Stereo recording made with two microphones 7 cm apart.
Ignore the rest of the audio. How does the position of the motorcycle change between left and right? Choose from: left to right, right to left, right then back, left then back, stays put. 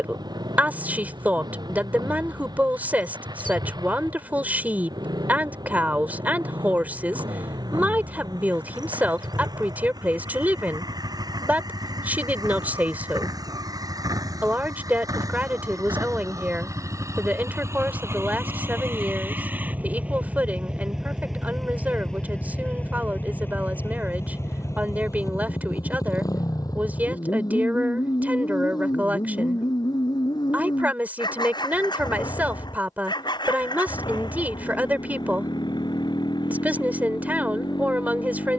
right to left.